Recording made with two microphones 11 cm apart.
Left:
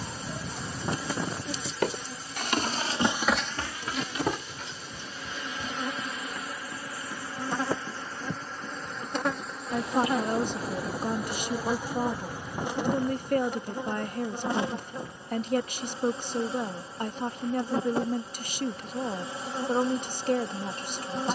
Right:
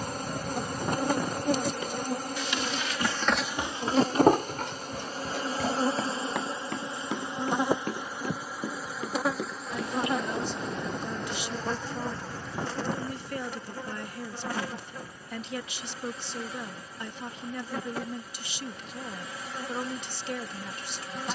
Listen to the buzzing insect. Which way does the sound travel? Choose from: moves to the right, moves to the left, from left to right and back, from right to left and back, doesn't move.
moves to the left.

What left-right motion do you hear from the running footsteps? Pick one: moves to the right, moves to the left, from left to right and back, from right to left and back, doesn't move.
moves to the right.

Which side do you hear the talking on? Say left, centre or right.
left.